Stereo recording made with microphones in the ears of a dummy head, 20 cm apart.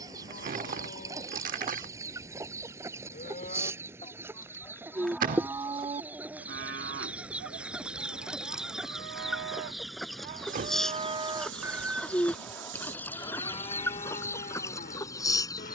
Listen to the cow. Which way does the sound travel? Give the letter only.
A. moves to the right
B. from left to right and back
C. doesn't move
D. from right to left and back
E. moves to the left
B.